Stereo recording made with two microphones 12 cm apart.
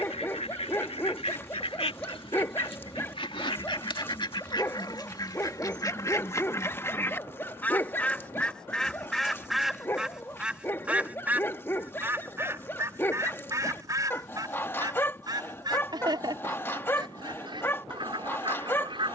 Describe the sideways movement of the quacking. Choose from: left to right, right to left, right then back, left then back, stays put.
left to right.